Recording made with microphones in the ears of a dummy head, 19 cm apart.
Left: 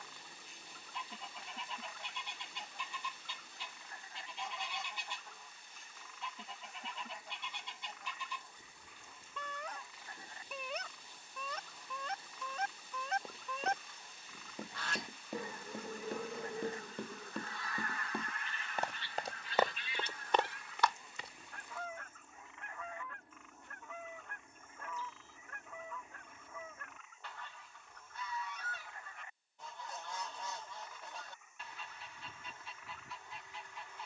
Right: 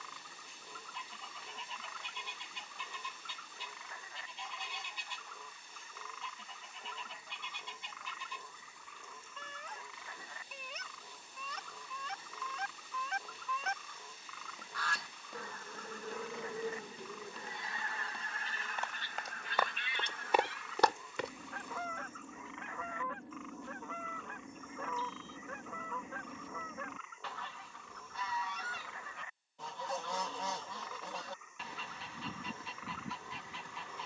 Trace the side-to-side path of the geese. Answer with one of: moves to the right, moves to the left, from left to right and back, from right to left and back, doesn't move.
moves to the right.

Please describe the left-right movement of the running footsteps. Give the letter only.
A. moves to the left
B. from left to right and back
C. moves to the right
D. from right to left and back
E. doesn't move
C.